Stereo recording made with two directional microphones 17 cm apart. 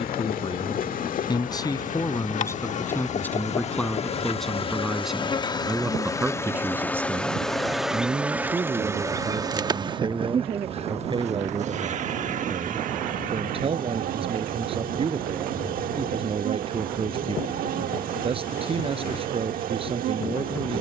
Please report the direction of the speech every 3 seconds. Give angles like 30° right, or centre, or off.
20° left, centre, 10° right, 30° right, 30° right, 30° right, 30° right.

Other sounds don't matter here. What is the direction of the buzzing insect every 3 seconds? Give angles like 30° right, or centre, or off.
50° left, 30° left, centre, 30° right, 50° right, 60° right, 60° right.